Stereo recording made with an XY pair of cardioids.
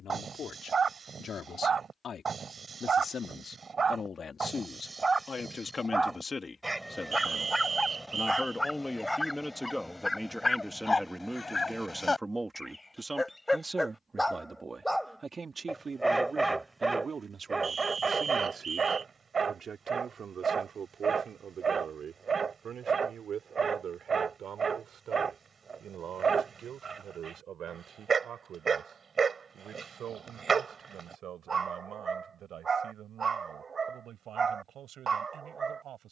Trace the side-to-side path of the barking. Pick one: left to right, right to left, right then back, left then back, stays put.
left then back.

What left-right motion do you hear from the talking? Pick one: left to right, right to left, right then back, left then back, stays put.
left to right.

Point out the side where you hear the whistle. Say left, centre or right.
right.